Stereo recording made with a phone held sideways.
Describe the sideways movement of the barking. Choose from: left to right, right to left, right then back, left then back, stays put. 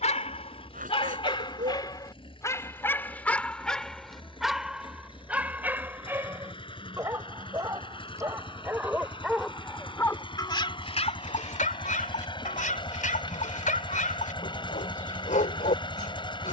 right then back.